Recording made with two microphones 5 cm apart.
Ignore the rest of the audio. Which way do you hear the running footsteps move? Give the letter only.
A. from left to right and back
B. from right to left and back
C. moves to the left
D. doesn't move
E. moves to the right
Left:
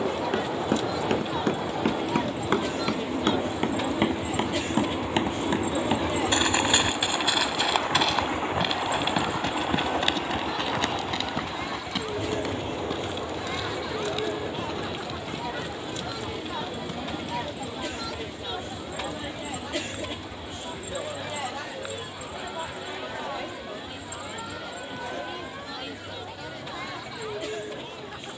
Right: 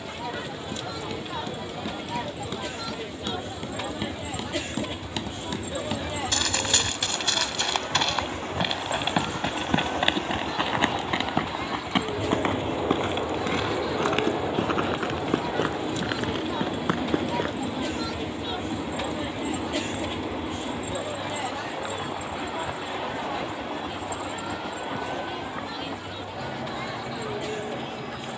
E.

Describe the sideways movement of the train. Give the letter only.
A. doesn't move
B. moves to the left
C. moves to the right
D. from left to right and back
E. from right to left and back
C.